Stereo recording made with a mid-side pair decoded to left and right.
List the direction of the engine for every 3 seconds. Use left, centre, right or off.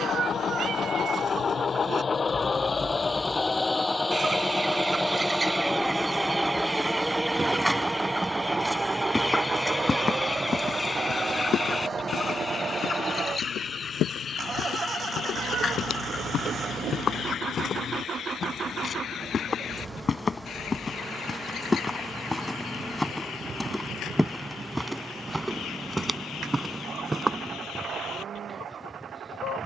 left, centre, centre, right, right, right, right, right, right, right.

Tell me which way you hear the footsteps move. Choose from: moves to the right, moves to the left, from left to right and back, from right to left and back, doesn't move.
from right to left and back.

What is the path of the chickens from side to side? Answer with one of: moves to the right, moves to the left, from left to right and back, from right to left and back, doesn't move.
moves to the left.